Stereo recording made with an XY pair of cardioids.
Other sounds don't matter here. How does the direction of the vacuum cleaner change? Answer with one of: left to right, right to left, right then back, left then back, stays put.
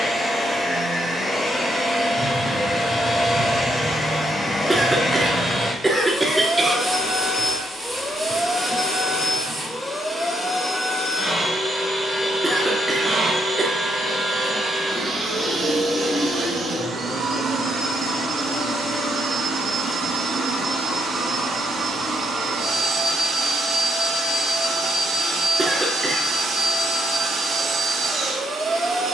left to right.